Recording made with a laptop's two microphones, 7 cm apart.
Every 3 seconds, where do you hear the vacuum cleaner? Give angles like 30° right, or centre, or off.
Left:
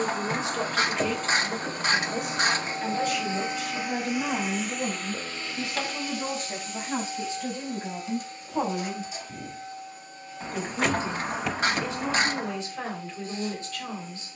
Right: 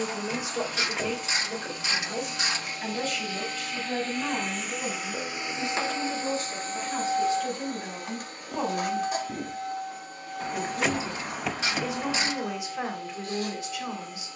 40° left, centre, 50° right, 70° right, 80° right.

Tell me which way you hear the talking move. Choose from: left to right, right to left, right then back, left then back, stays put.
left then back.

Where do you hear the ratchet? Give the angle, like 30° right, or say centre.
50° left.